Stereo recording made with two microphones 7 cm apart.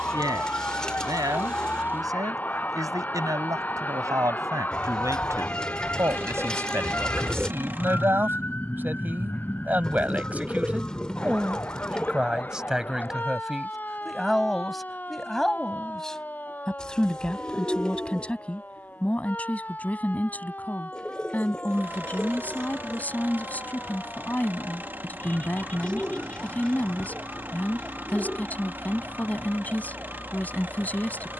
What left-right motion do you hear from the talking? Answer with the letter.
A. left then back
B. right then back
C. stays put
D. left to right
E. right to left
E.